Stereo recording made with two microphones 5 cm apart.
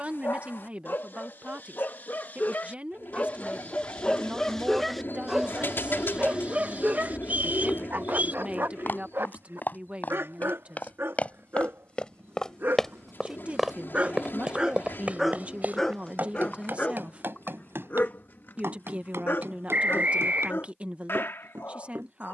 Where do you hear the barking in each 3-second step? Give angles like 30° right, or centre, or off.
50° left, 10° left, 40° right, 60° right, 40° right, 20° left, 60° left, 60° left.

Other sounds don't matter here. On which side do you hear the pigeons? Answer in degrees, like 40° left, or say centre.
60° left.